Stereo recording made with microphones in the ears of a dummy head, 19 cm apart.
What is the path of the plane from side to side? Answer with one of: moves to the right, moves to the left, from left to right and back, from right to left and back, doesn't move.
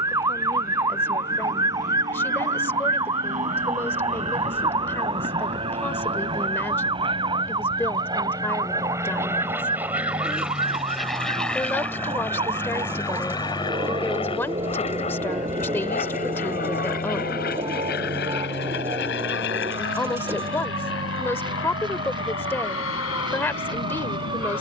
moves to the left.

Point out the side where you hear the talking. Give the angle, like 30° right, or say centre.
10° left.